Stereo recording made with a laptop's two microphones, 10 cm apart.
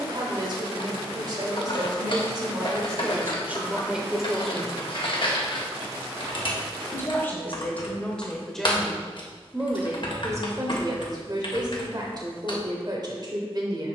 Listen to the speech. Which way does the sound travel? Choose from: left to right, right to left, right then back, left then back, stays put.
left then back.